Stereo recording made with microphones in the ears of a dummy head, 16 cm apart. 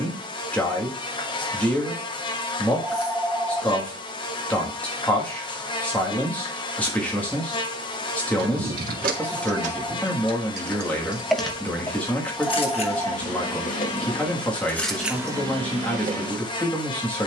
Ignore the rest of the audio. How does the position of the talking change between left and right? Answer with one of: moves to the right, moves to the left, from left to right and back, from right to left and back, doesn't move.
doesn't move.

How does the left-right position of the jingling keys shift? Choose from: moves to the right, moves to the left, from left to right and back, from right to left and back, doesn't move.
from right to left and back.